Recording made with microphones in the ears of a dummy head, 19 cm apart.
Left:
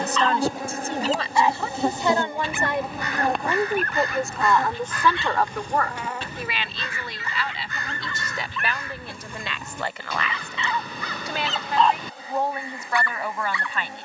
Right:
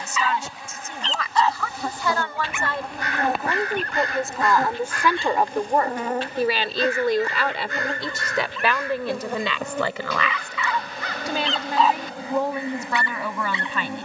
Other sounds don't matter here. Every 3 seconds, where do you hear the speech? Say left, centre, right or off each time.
left, centre, right, right, right.